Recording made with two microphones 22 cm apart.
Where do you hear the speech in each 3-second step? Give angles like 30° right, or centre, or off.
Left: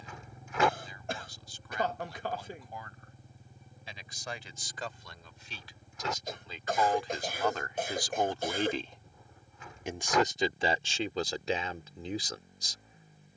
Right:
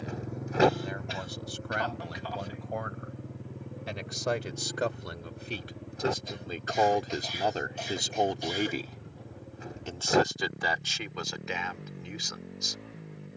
80° right, 70° right, 30° right, 30° left, 30° left.